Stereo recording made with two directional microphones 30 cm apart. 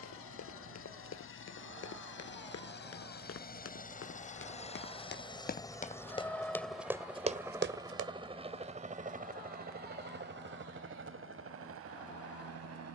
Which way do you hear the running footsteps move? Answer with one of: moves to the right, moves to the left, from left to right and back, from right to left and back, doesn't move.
moves to the right.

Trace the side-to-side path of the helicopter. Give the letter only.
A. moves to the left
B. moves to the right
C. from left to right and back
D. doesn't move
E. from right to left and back
B.